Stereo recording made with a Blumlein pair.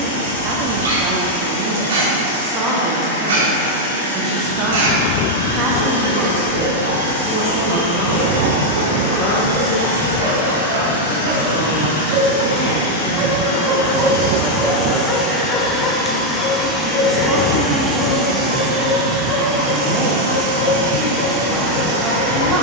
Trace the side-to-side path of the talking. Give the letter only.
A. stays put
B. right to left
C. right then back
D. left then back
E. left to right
D.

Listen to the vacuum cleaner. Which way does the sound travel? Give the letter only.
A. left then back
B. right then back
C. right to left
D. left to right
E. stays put
D.